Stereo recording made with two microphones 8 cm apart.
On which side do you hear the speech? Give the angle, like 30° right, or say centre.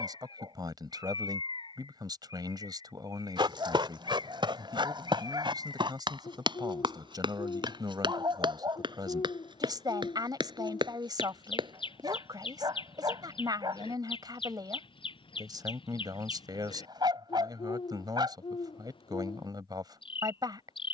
50° right.